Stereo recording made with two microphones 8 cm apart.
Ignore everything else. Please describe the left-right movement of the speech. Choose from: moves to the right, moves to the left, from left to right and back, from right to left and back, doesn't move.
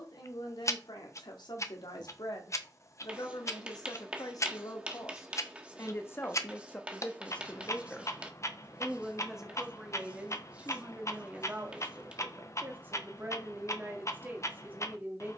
moves to the right.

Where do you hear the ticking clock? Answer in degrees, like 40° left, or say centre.
40° left.